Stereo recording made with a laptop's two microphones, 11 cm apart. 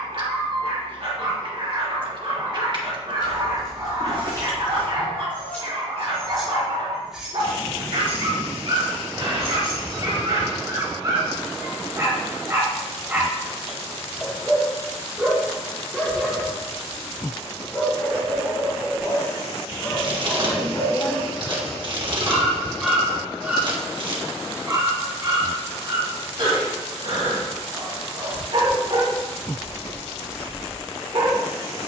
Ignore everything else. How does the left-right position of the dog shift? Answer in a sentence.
You can hear the dog move from right to left and back again.